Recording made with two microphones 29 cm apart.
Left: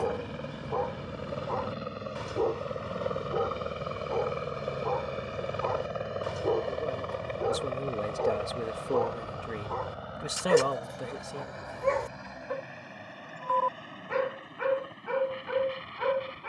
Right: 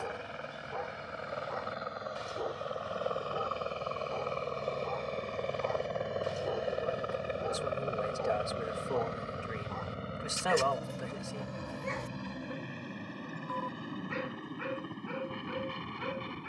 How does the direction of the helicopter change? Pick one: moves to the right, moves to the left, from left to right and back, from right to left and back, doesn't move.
moves to the right.